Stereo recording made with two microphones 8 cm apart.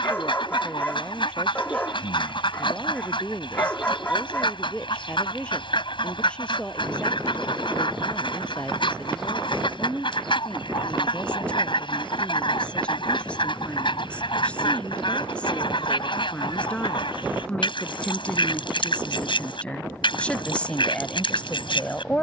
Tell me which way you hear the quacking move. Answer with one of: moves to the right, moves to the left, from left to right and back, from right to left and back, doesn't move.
doesn't move.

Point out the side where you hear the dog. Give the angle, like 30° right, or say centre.
20° left.